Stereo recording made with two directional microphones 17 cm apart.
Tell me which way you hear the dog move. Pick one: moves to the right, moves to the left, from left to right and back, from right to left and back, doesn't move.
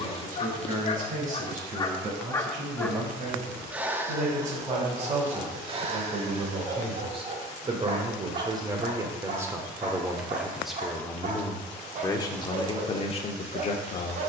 moves to the right.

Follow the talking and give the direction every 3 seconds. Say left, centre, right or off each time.
right, right, right, centre, left.